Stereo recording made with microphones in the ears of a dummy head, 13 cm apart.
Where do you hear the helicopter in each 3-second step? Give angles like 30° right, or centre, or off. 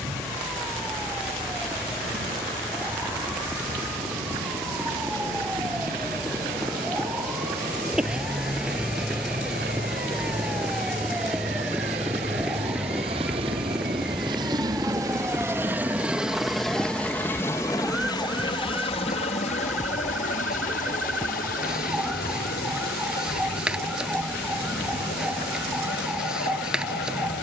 70° right, 70° right, 60° right, 60° right, 40° right, centre, 40° left, 70° left, 80° left.